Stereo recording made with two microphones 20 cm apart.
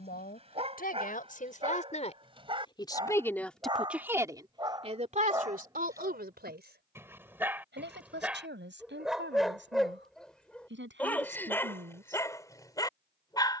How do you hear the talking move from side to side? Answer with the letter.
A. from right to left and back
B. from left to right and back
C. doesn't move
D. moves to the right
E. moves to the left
D.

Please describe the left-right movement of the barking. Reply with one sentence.
You can hear the barking go from the right side to the left.